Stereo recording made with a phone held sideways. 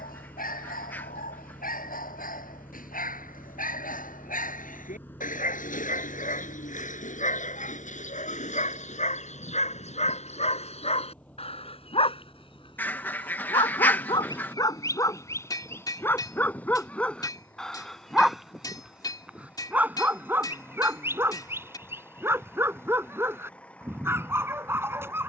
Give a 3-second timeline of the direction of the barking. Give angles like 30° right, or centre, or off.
70° left, 60° left, 60° left, 50° left, 30° left, 10° left, 10° right, 20° right, 20° right.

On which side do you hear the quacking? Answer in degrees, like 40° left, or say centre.
10° left.